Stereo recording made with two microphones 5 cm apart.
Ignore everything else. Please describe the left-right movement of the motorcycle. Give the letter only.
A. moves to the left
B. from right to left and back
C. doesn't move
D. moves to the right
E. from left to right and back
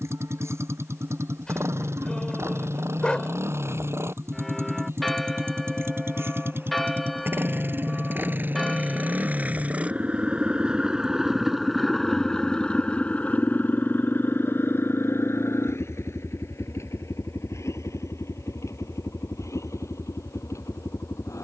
A.